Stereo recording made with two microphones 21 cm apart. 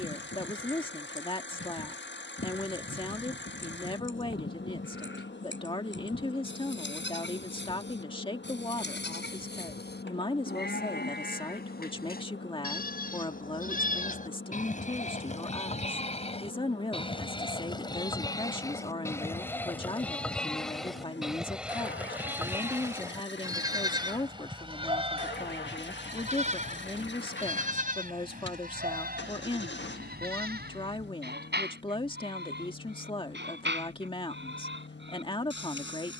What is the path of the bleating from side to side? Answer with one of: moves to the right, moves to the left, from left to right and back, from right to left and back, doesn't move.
moves to the right.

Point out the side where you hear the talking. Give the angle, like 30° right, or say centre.
20° left.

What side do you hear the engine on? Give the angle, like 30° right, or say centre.
60° left.